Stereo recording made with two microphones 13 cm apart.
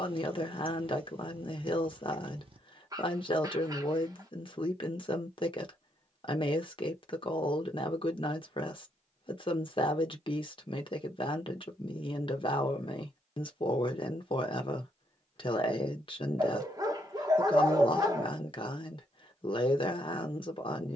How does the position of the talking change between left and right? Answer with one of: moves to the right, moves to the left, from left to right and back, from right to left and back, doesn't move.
doesn't move.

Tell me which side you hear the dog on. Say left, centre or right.
right.